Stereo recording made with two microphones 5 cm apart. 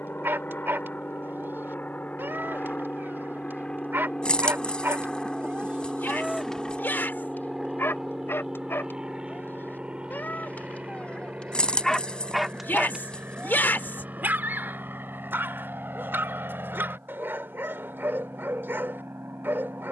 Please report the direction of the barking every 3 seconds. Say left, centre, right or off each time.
right, right, left, left, right, right, right.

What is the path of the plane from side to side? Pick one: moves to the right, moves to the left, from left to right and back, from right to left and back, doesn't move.
moves to the right.